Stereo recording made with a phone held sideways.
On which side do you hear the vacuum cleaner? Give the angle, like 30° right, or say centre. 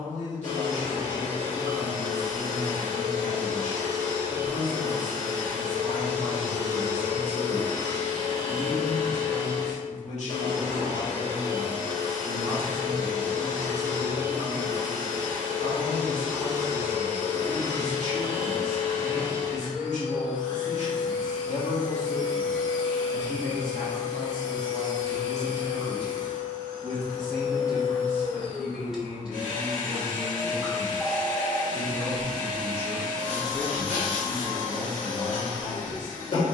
60° left.